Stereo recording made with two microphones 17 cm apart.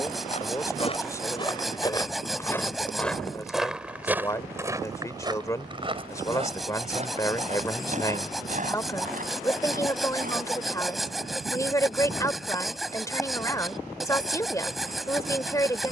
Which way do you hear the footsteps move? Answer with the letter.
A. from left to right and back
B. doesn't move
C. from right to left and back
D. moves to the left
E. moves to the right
E.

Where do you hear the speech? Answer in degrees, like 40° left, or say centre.
20° left.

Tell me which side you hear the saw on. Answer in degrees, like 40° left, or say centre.
centre.